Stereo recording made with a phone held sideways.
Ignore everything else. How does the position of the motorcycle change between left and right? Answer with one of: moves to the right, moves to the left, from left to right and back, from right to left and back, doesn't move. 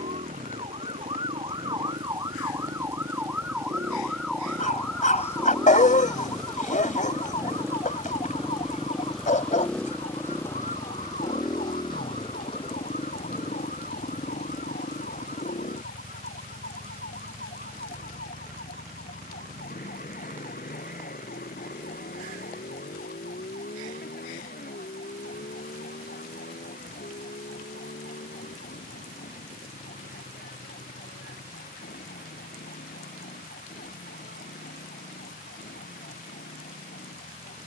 moves to the left.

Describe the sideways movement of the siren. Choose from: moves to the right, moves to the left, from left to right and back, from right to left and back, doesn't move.
moves to the left.